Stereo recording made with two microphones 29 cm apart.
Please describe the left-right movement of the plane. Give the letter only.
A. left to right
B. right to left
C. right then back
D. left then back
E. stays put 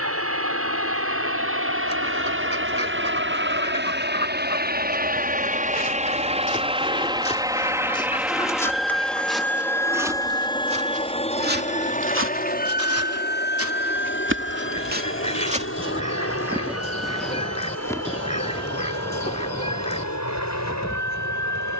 B.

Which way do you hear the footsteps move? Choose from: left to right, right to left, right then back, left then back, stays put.
right then back.